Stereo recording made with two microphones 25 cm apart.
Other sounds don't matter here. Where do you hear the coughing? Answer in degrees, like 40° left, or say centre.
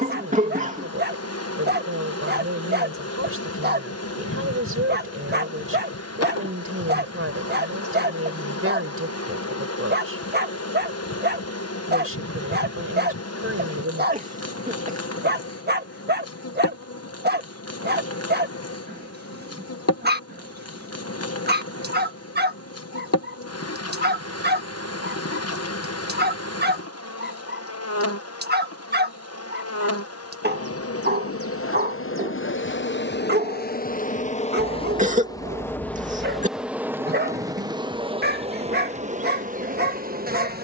30° right.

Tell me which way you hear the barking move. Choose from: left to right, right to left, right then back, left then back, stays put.
stays put.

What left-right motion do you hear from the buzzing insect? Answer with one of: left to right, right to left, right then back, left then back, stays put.
left to right.